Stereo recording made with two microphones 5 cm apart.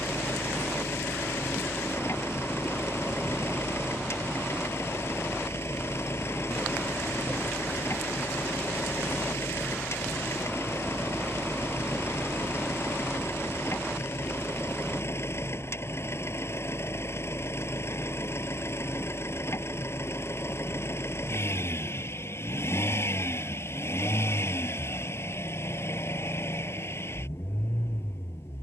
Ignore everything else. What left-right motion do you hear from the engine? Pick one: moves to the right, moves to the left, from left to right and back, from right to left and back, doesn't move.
doesn't move.